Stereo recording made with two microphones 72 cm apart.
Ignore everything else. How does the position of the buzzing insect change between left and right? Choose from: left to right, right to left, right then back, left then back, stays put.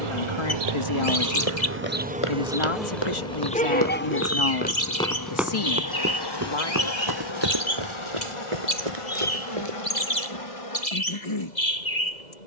right to left.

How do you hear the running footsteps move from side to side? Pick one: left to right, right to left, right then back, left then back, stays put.
left to right.